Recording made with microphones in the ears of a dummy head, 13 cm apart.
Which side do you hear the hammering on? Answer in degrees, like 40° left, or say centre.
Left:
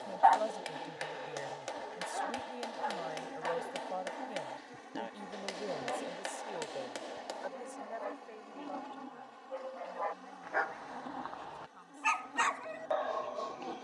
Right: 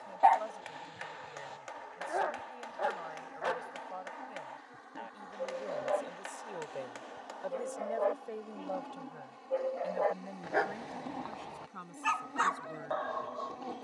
40° left.